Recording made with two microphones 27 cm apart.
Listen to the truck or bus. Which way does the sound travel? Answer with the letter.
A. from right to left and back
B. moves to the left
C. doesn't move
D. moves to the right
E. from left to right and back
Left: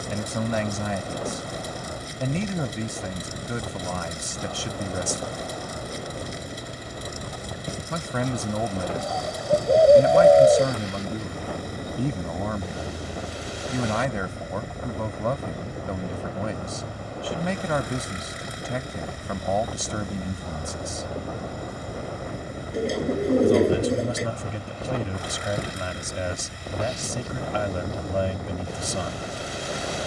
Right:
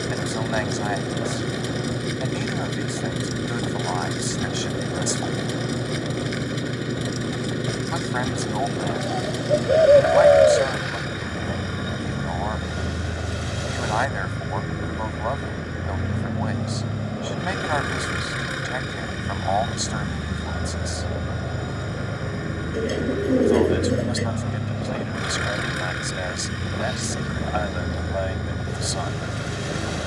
C.